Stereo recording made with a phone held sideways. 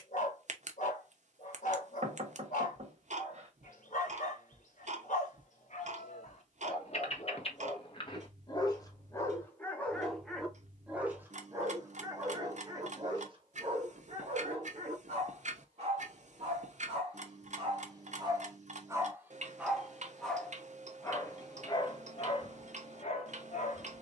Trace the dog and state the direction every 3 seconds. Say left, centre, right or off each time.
left, left, left, centre, right, right, centre, left.